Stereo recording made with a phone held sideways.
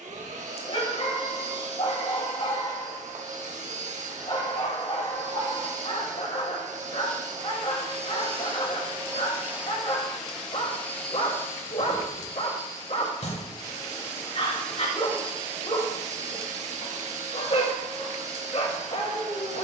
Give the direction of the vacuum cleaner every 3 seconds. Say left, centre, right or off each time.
right, right, right, centre, left, right, right.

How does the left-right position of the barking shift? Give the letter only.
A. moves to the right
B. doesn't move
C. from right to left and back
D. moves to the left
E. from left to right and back
B.